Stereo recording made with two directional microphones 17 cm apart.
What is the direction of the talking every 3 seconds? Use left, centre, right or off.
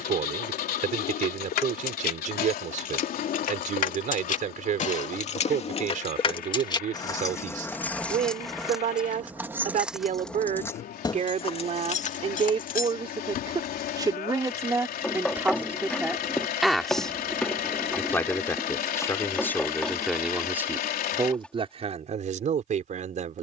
right, right, right, right, right, centre, centre, right.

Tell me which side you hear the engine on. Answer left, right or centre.
left.